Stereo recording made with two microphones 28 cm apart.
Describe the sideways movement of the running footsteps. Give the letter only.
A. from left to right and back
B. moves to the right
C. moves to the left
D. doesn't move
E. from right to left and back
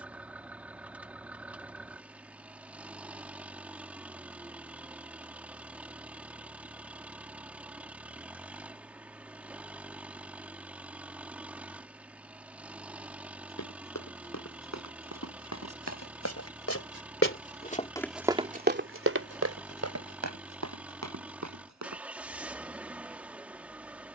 B.